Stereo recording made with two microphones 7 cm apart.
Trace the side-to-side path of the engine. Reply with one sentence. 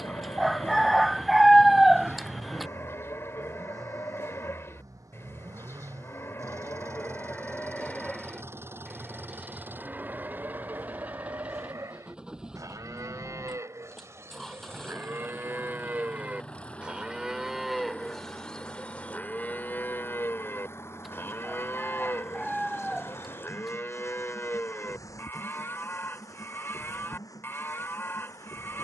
You can hear the engine travel towards the left.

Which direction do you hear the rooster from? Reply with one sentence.
You can hear the rooster in the centre.